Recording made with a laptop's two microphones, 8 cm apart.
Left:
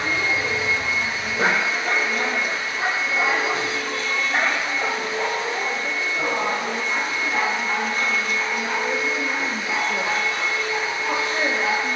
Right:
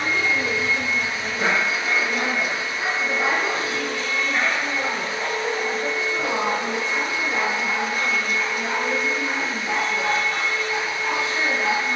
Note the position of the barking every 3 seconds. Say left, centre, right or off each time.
left, left, centre, right.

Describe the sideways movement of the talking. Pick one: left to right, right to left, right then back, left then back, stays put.
right to left.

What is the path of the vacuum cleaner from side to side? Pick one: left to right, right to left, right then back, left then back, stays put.
right then back.